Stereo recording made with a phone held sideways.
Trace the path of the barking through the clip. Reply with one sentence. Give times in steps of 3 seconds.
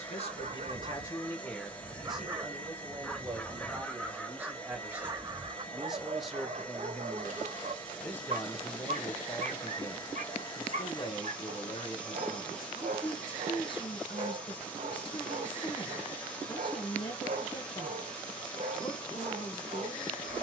In this clip you hear the barking on the right from 0 s, in the centre from 3 s and on the right from 6 s.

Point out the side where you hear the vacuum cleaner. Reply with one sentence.
You can hear the vacuum cleaner in the centre.